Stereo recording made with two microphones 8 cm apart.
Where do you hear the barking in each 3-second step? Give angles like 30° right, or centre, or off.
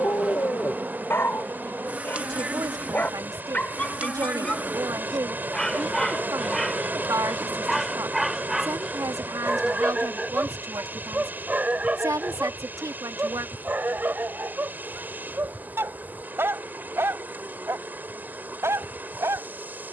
30° left, 10° left, centre, 10° right, 20° right, 30° right, 30° right.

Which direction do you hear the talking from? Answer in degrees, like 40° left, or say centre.
50° right.